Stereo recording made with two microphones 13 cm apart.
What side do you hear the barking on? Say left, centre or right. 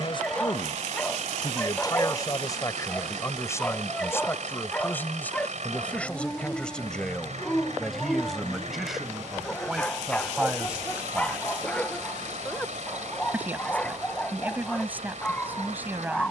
centre.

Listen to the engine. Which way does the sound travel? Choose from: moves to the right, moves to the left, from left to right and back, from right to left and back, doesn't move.
doesn't move.